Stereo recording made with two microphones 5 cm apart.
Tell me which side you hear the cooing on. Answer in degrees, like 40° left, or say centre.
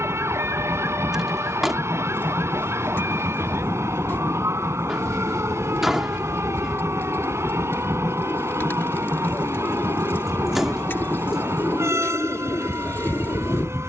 50° left.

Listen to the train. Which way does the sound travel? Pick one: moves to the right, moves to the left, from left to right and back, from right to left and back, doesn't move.
doesn't move.